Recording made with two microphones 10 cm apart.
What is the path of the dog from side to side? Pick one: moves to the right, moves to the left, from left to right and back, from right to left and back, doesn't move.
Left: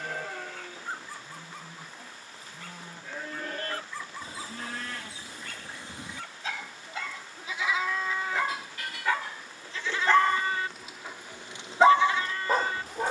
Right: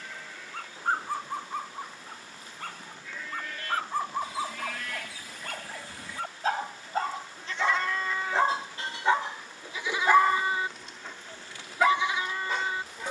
moves to the left.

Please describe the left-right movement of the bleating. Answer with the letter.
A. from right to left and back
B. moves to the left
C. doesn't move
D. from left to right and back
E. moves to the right
E.